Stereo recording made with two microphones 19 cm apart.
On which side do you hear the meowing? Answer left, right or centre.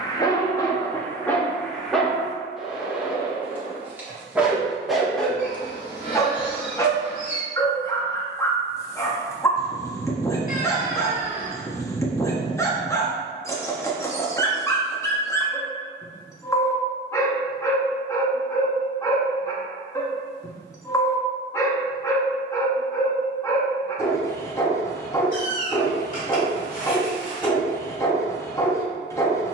left.